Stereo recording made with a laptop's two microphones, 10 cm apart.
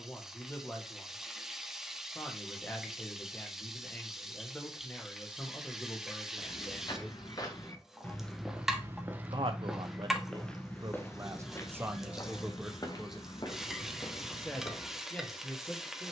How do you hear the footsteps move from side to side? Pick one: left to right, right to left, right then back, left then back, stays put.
right then back.